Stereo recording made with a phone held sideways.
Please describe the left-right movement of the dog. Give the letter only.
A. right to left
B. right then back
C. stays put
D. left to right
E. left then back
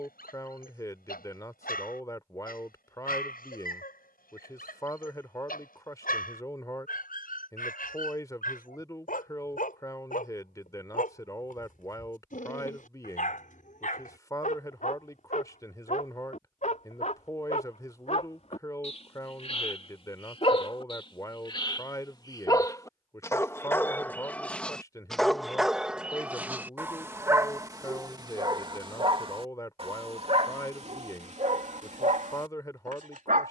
D.